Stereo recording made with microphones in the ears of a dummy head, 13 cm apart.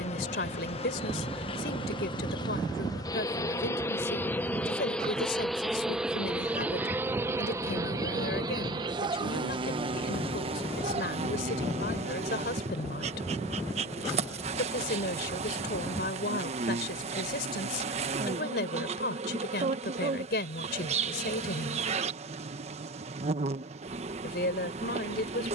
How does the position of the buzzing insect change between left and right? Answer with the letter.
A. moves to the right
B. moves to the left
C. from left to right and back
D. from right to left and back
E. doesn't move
A.